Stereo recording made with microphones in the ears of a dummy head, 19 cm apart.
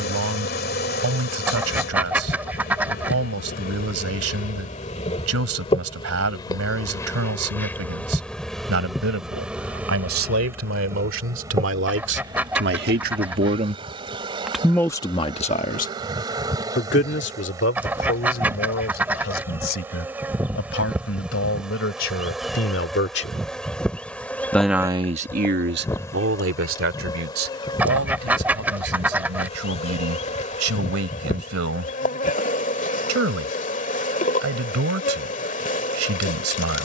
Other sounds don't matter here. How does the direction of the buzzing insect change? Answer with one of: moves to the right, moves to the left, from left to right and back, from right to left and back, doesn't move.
from left to right and back.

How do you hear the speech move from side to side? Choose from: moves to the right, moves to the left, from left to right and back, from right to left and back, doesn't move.
from right to left and back.